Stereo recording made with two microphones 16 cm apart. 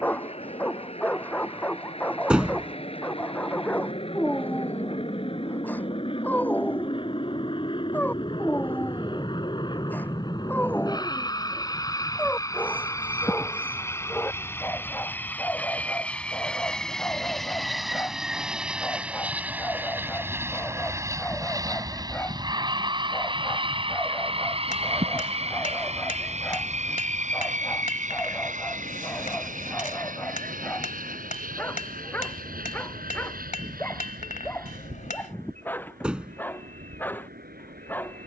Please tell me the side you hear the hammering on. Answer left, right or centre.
left.